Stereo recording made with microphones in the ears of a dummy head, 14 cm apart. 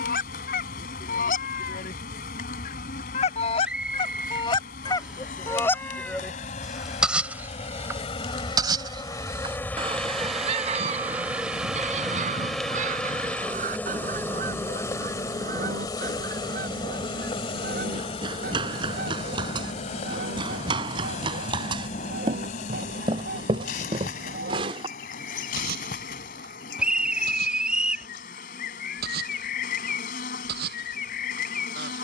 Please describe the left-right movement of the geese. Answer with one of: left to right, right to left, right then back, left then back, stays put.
left to right.